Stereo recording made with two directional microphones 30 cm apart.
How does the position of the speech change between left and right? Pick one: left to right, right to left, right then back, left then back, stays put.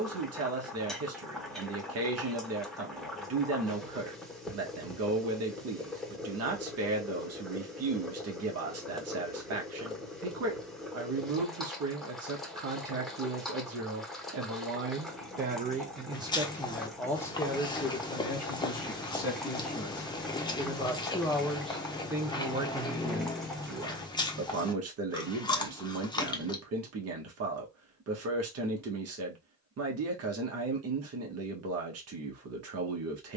left then back.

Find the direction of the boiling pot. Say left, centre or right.
centre.